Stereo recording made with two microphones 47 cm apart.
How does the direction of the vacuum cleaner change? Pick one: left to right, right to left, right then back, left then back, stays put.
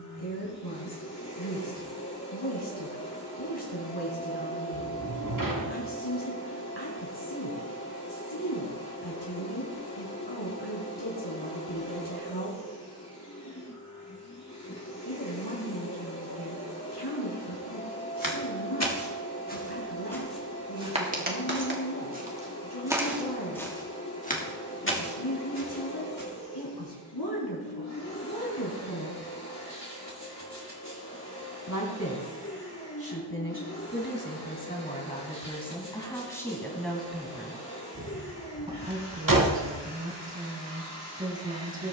stays put.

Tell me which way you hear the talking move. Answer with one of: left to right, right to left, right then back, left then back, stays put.
left to right.